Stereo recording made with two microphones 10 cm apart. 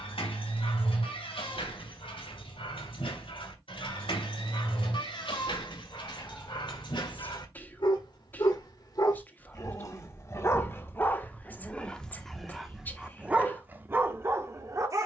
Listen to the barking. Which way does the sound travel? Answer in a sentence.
In this clip you hear the barking travel towards the right.